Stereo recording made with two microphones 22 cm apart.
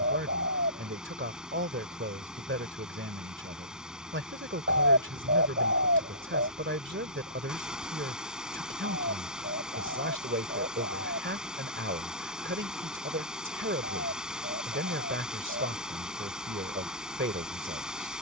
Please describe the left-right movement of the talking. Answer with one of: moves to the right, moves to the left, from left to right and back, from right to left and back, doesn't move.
doesn't move.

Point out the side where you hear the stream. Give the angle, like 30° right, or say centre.
centre.